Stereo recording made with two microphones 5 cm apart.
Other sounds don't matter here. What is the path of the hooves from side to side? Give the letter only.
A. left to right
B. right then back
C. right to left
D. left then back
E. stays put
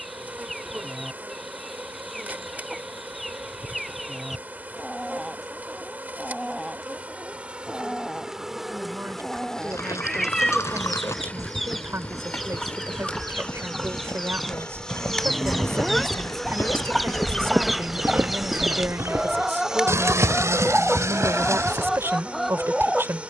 A.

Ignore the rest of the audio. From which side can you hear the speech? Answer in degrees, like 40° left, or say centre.
60° right.